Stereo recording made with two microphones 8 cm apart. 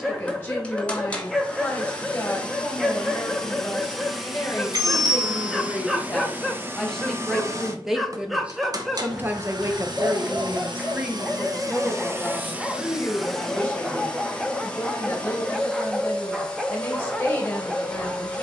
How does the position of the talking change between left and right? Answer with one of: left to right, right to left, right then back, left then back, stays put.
right then back.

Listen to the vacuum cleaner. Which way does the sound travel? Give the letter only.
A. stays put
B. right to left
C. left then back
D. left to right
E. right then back
E.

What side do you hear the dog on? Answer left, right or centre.
centre.